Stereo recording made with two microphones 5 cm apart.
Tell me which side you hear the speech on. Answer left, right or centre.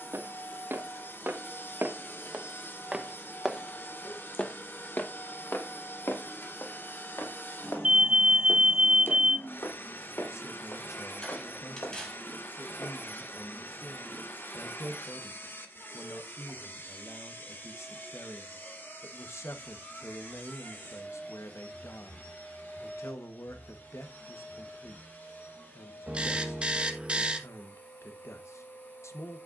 left.